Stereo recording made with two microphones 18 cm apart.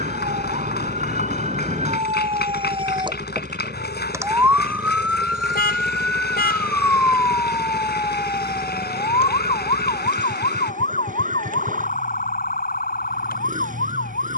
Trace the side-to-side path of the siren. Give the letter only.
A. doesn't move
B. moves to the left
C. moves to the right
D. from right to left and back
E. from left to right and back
B.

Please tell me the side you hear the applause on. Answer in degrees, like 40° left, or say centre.
60° left.